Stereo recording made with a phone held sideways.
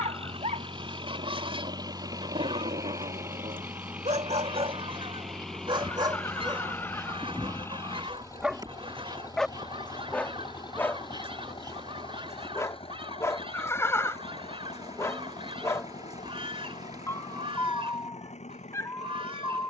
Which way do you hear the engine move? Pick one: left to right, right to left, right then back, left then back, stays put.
right to left.